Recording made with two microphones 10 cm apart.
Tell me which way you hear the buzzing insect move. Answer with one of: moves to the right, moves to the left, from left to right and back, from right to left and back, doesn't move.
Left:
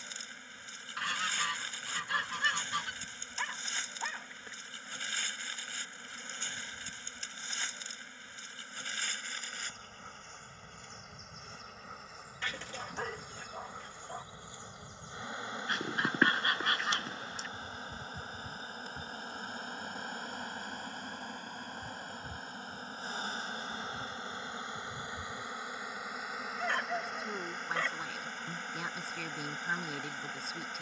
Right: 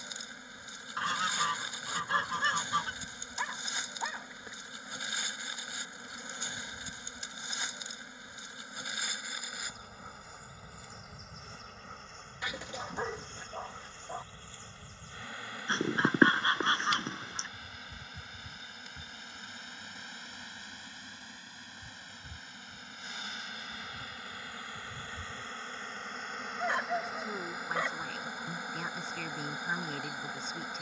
from right to left and back.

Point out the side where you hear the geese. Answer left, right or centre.
right.